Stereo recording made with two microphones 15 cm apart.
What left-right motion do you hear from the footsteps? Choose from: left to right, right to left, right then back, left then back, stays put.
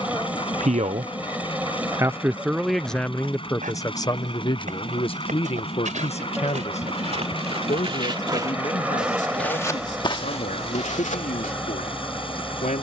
right to left.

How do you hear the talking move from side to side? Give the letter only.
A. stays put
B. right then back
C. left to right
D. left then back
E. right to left
E.